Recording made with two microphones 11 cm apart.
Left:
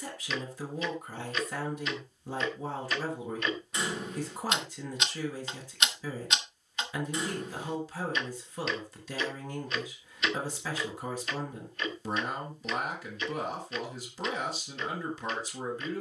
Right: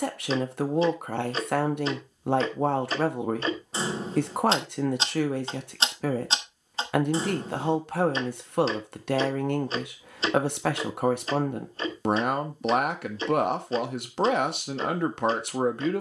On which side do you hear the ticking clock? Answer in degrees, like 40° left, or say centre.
30° right.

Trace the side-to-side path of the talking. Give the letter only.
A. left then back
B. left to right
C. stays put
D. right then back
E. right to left
C.